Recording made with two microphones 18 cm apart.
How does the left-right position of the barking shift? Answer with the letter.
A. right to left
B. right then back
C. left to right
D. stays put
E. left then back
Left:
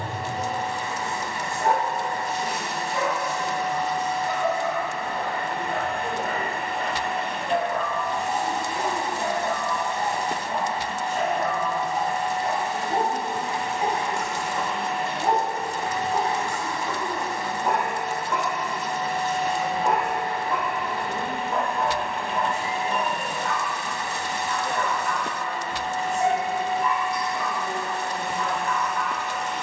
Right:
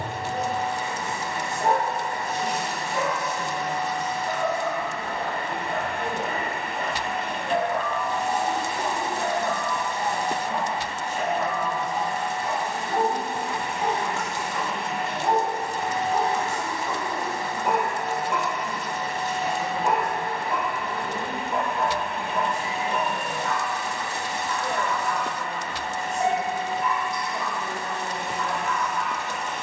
E.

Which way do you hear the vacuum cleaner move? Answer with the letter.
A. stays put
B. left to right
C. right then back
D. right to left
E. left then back
A.